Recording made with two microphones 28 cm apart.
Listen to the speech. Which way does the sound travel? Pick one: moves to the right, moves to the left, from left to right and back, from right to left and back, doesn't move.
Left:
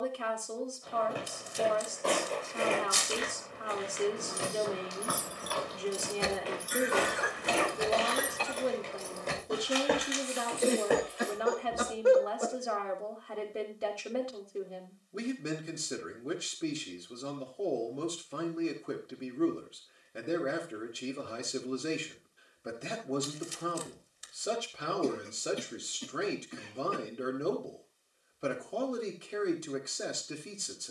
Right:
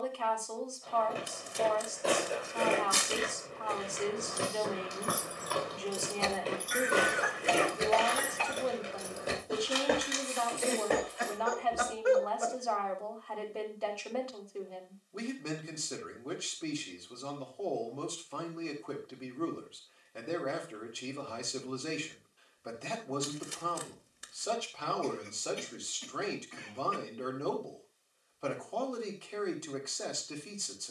doesn't move.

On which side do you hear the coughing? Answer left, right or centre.
left.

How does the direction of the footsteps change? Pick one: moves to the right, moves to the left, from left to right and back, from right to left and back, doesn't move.
from left to right and back.